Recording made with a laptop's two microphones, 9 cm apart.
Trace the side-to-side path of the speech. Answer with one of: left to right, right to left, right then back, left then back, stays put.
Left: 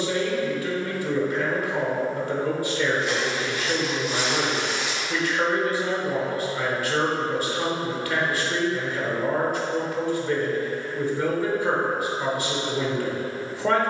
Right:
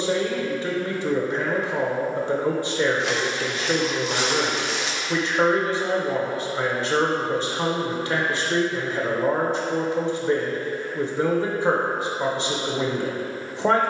stays put.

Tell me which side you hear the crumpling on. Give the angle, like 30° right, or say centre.
70° right.